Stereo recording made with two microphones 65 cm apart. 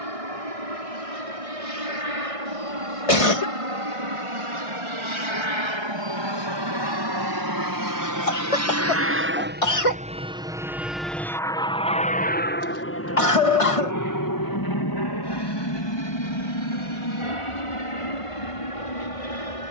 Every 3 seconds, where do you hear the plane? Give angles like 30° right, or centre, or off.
60° right, 50° right, 30° right, 10° right, 20° left, 40° left, 50° left.